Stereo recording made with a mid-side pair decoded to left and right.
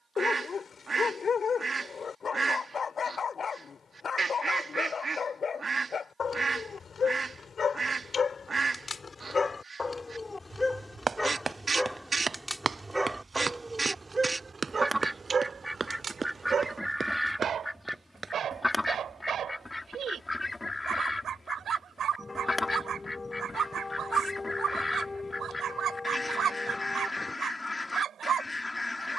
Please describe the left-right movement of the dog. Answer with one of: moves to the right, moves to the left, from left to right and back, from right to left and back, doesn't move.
moves to the right.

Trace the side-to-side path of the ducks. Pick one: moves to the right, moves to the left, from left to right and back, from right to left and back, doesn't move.
moves to the left.